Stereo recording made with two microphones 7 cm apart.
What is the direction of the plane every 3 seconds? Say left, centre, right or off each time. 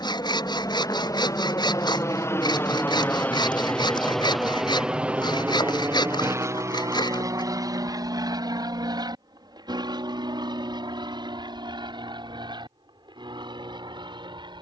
left, centre, right, right, right.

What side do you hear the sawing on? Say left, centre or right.
left.